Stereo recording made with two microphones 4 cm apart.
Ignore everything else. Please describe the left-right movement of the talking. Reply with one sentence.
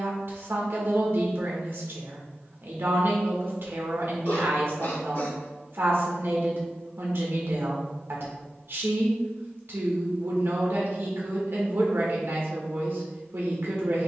You can hear the talking stay put.